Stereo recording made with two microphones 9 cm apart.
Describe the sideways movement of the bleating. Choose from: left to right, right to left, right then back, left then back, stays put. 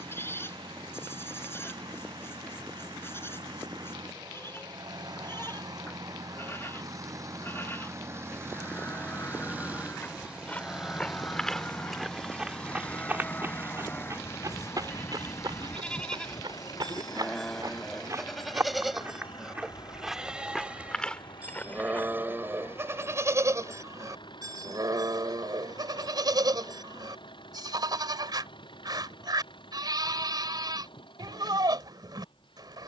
left to right.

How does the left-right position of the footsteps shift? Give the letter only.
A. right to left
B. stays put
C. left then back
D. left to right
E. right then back
E.